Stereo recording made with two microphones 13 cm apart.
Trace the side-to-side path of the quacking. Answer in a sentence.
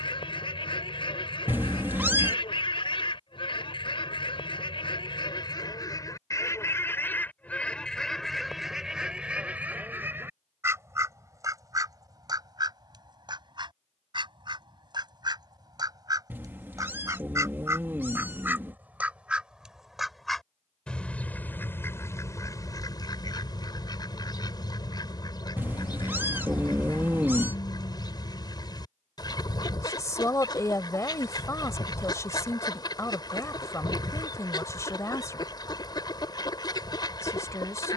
In this clip you hear the quacking go right and come back.